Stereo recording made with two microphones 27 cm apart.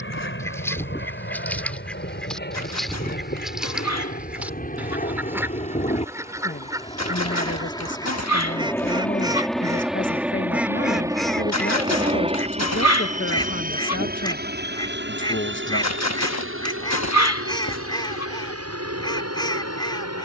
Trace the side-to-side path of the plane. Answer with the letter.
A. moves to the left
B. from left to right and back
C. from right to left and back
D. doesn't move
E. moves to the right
E.